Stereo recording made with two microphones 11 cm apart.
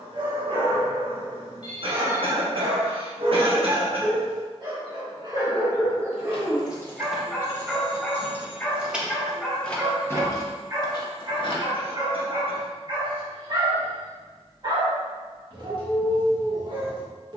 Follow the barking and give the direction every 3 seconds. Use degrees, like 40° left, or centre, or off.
50° right, 40° right, 10° right, 20° right, 40° right, 40° right.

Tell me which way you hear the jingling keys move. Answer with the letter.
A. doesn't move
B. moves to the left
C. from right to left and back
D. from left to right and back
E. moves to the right
D.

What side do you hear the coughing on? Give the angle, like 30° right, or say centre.
60° right.